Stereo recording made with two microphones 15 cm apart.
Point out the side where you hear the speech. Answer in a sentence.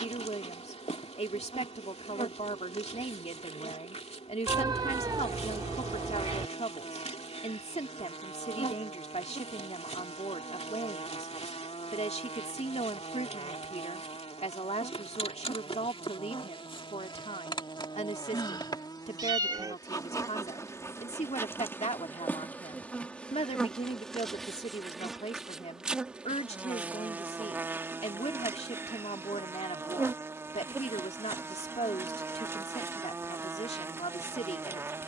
In this clip you hear the speech on the left.